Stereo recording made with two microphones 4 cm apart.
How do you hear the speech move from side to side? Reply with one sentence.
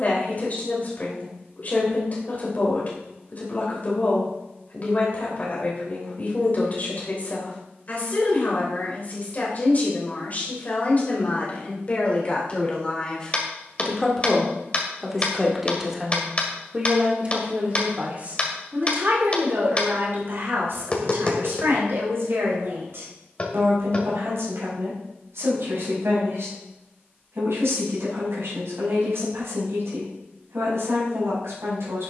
You can hear the speech move from left to right.